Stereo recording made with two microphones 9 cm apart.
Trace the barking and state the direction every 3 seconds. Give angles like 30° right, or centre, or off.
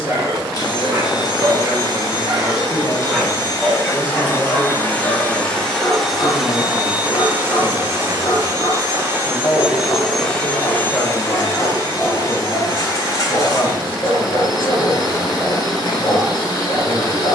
30° right, 20° left, 40° left, 40° left, 40° left, 40° left.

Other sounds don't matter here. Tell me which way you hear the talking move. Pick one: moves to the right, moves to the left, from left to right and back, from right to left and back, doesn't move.
doesn't move.